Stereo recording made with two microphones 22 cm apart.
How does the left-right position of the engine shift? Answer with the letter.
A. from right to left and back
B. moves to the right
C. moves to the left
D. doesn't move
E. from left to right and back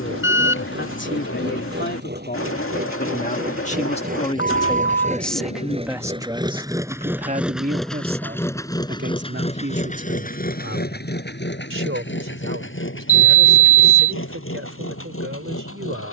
C.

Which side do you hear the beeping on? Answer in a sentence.
In this clip you hear the beeping on the left.